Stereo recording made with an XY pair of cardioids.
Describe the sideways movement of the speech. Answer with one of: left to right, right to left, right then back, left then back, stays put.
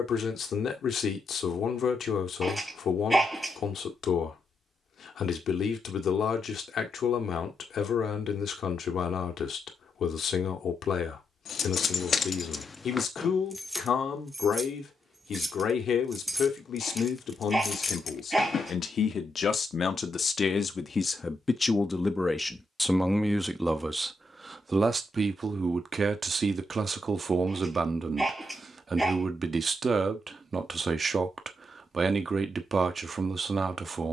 left to right.